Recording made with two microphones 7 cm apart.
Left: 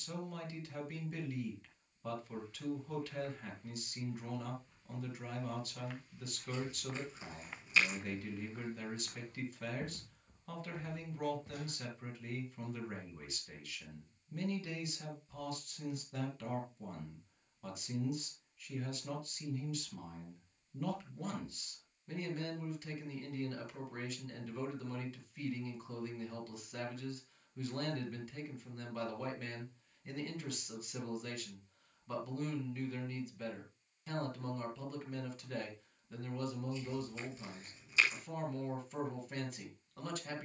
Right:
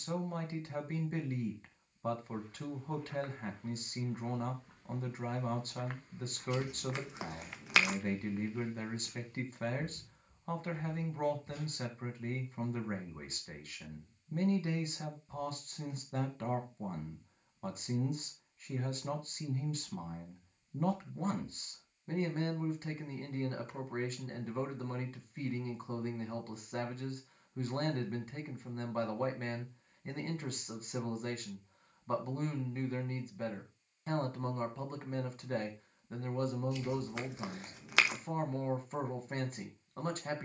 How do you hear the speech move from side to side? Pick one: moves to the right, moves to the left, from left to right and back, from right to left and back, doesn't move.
doesn't move.